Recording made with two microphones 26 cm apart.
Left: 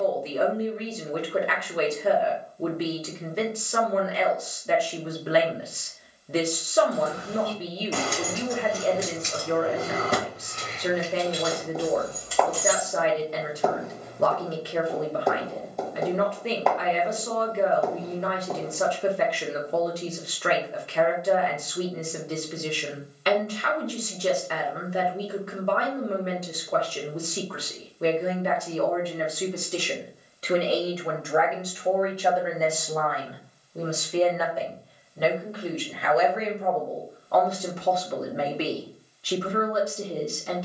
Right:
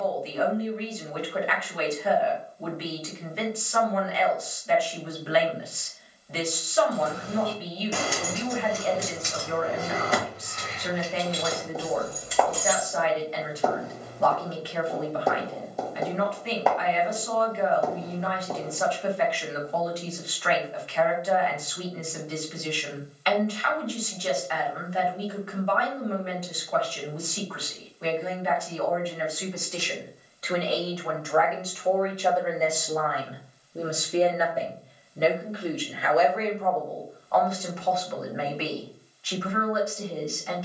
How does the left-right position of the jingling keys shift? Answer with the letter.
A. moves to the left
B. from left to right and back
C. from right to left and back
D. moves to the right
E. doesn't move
C.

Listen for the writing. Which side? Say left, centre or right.
centre.